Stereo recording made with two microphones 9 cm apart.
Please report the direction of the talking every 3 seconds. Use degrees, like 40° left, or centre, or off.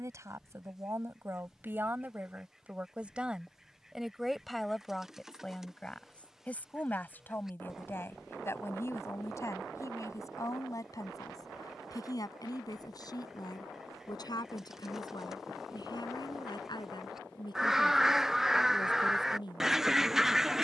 30° right, centre, 20° left, 40° left, 50° left, 60° left, 60° left.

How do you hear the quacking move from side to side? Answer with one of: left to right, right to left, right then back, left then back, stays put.
stays put.